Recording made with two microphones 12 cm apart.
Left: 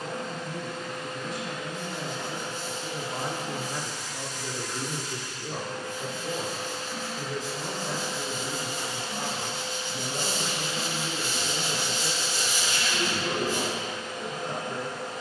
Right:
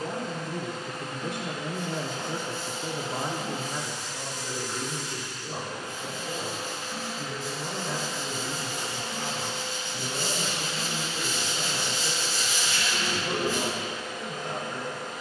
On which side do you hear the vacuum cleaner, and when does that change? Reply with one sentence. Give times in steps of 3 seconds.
In this clip you hear the vacuum cleaner on the right from 0 s, in the centre from 6 s and on the left from 9 s.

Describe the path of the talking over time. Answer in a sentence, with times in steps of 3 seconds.
You can hear the talking on the right from 0 s, in the centre from 3 s and on the left from 6 s.